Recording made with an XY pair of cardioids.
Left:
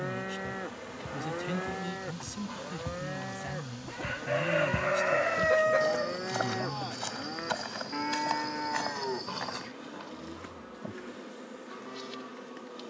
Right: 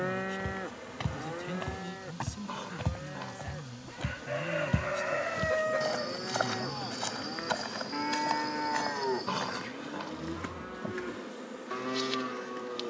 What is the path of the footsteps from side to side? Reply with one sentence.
You can hear the footsteps move from right to left.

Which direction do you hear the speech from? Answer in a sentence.
In this clip you hear the speech on the left.